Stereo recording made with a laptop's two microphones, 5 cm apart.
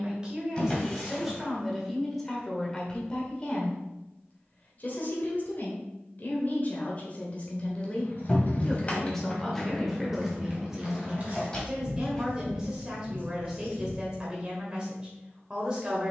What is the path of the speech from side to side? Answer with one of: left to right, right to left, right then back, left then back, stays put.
left then back.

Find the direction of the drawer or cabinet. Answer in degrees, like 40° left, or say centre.
20° left.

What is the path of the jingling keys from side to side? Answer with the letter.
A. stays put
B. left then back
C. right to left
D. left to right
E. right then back
D.